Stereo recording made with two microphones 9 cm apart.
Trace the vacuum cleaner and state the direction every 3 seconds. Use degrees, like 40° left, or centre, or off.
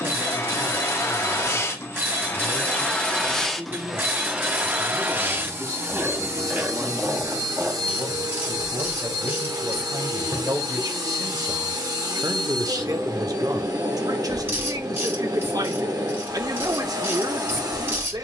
30° left, 10° right, 40° right, 50° right, 50° right, 50° right.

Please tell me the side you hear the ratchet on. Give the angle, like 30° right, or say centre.
20° right.